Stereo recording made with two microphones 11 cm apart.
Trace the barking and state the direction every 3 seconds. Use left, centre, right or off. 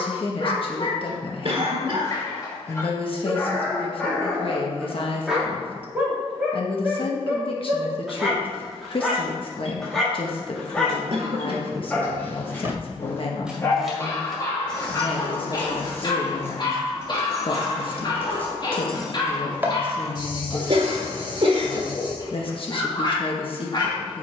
left, centre, centre, centre, left, left, left, left.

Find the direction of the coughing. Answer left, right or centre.
right.